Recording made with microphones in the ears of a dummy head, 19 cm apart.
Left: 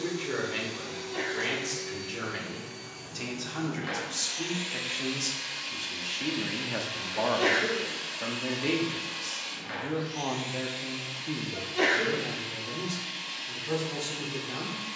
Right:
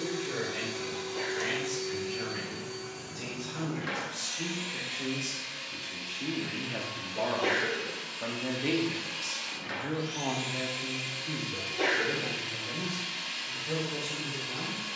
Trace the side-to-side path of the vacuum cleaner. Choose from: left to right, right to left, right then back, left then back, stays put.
left then back.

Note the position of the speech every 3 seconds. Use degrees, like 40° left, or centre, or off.
70° left, 60° left, 20° left, 20° left, 70° left.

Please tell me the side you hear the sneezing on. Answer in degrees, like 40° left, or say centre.
70° left.